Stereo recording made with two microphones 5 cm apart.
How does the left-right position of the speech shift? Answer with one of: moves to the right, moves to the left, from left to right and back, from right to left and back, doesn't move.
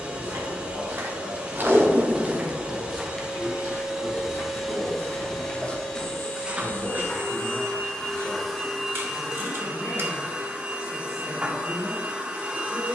doesn't move.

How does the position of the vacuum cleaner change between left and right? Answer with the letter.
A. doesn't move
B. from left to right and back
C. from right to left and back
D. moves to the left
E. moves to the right
C.